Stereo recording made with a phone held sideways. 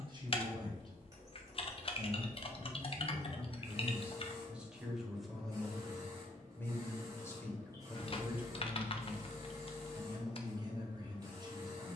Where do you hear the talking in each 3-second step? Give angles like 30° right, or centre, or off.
30° right, 10° right, centre, 30° right.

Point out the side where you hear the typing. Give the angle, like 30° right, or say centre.
40° left.